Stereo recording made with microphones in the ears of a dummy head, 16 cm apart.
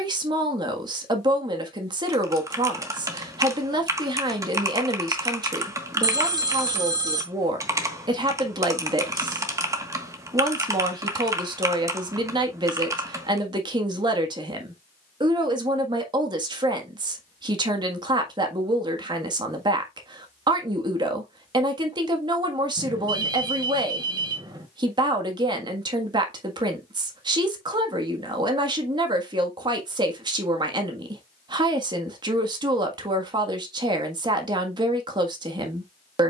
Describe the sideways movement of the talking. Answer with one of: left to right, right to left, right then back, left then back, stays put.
stays put.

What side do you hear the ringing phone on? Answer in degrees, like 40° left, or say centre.
20° right.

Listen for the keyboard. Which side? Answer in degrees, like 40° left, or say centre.
20° right.